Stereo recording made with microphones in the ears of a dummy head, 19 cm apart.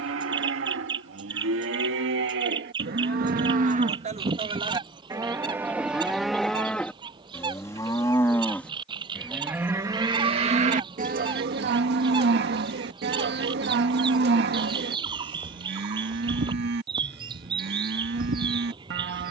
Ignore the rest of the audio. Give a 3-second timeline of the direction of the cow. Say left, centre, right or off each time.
right, right, centre, right, right, right, right.